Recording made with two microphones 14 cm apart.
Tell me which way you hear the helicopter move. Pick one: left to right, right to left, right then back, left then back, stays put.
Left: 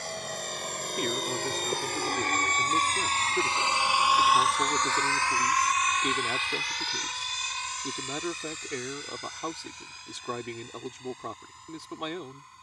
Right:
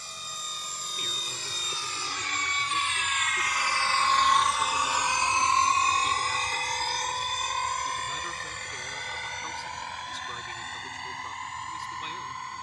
left to right.